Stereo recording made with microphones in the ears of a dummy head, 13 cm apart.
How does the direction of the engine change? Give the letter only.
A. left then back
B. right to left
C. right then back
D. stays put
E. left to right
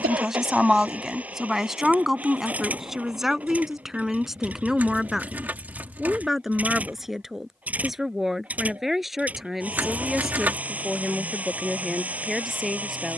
D.